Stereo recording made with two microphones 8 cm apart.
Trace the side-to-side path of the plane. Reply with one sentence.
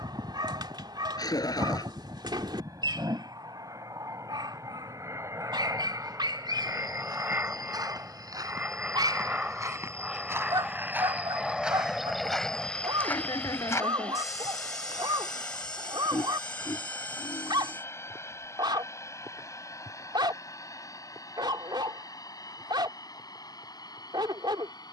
You can hear the plane move to the left.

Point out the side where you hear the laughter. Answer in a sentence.
You can hear the laughter on the left.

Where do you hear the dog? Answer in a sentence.
In this clip you hear the dog on the right.